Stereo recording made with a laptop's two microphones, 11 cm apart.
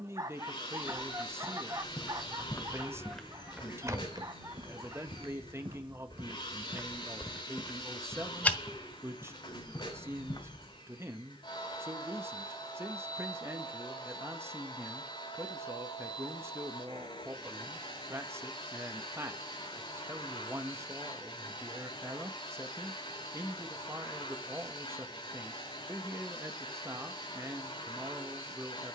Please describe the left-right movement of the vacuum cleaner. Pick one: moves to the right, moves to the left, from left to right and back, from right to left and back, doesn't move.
doesn't move.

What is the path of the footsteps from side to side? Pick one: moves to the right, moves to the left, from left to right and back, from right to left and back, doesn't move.
from left to right and back.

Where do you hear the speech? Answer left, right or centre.
right.